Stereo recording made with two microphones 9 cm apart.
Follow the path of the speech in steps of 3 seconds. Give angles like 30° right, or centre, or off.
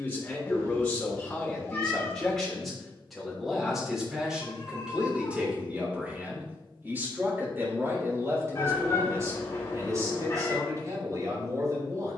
10° left, 10° right, 30° right, 40° right.